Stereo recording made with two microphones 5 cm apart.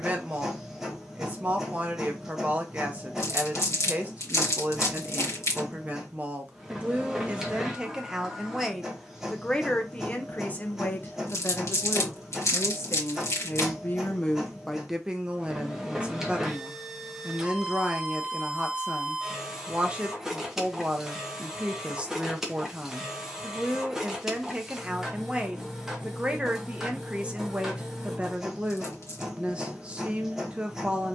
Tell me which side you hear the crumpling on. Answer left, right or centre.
left.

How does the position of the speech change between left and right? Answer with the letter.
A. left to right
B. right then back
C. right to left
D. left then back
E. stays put
D.